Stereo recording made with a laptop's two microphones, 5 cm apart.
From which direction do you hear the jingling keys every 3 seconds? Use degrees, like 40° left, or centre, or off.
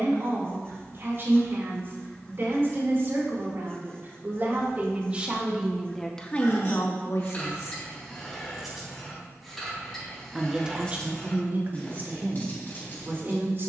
off, off, 20° left, 10° left, 40° left.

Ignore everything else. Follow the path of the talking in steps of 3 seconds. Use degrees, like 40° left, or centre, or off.
50° right, 30° right, 50° left, 20° right, 40° right.